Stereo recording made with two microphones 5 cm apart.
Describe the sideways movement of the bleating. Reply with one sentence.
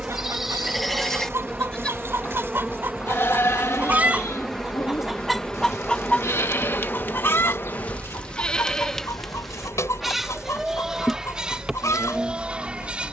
You can hear the bleating go left and come back.